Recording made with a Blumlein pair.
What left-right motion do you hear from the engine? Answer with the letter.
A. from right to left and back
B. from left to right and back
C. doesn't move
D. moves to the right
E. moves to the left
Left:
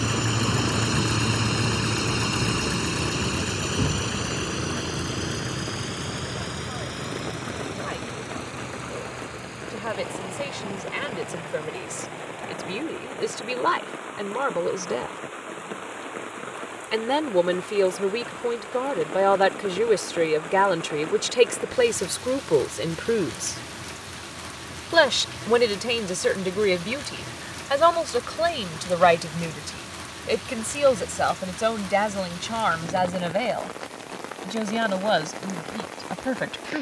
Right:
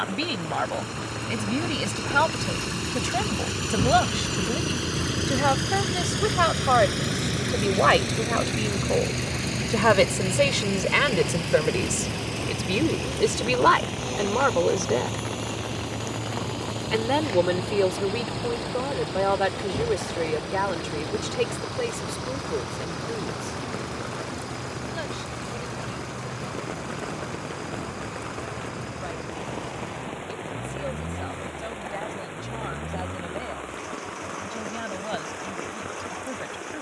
D.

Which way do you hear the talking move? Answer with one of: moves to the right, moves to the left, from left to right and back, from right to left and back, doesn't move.
moves to the left.